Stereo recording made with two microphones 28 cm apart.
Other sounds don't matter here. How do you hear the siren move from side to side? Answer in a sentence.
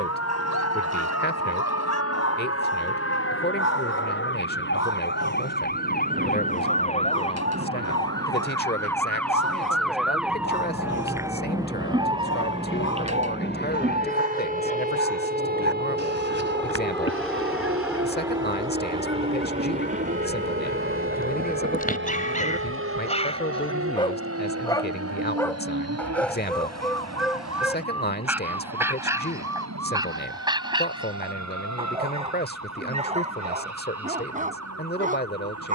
In this clip you hear the siren move to the right.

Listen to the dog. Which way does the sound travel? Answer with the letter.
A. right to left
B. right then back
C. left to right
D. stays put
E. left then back
C.